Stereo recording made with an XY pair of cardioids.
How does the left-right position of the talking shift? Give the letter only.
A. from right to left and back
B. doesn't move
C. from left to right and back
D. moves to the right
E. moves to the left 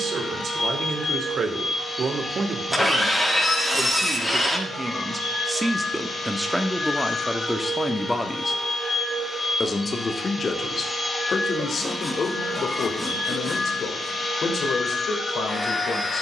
E.